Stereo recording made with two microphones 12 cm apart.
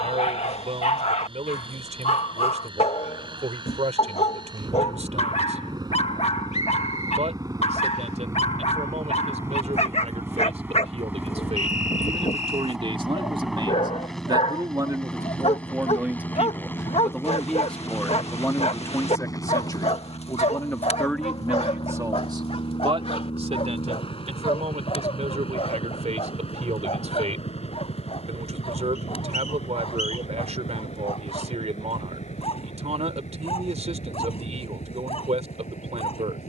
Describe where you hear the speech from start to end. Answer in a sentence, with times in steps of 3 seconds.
You can hear the speech on the right from 0 s, in the centre from 15 s, on the left from 18 s and on the right from 21 s.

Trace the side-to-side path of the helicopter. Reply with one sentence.
In this clip you hear the helicopter move to the left.